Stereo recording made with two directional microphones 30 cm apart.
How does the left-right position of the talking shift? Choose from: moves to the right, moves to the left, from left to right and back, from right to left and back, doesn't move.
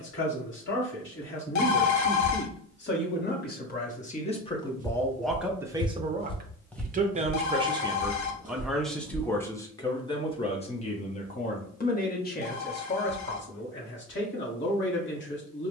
from left to right and back.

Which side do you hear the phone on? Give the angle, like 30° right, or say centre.
70° left.